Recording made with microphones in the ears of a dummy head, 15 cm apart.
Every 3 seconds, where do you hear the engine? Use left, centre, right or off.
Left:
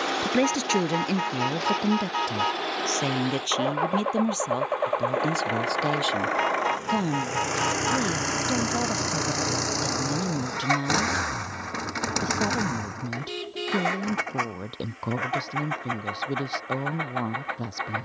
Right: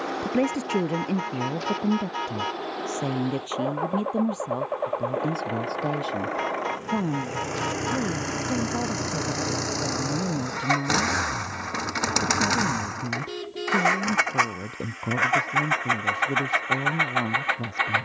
left, left, left, centre, right, right.